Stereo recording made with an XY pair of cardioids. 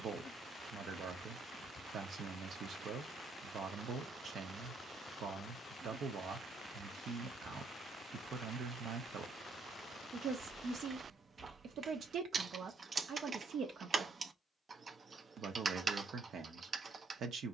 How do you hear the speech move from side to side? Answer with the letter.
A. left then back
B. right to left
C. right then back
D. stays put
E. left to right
D.